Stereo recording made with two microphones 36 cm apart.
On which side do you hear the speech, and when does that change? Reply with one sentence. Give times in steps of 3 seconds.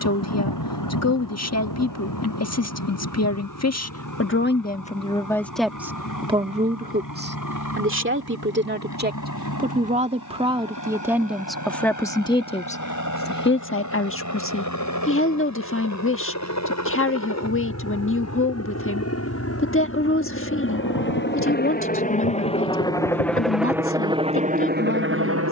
You can hear the speech on the left from 0 s, on the right from 6 s, in the centre from 9 s and on the left from 12 s.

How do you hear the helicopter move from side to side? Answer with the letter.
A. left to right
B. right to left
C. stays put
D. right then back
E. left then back
A.